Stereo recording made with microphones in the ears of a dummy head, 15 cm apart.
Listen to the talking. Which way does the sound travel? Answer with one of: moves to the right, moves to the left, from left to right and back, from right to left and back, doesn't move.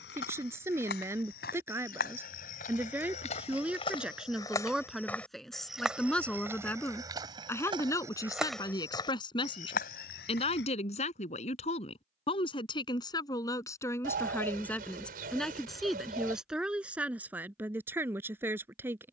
from right to left and back.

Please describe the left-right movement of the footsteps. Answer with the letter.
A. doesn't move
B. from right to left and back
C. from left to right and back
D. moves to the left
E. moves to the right
C.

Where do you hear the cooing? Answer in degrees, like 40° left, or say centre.
60° right.